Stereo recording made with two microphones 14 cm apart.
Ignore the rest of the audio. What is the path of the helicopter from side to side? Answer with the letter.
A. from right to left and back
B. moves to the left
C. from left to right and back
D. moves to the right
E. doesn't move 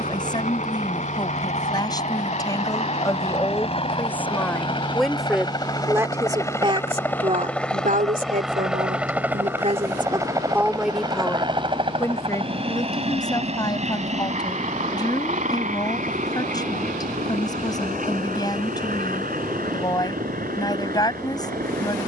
D.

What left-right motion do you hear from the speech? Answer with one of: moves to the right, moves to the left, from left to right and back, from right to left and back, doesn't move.
from left to right and back.